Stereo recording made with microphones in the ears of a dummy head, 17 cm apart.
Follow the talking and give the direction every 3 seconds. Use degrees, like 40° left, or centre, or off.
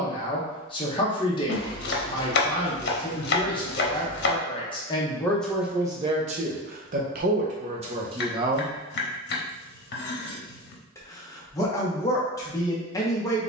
20° left, 20° left, 30° right, 20° left, 20° left.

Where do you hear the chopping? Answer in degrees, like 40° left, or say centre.
50° left.